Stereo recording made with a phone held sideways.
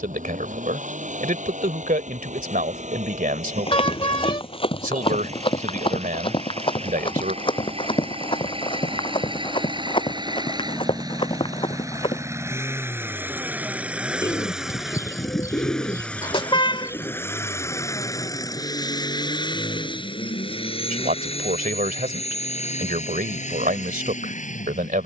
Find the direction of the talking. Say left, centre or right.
right.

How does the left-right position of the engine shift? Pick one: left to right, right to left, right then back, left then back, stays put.
right to left.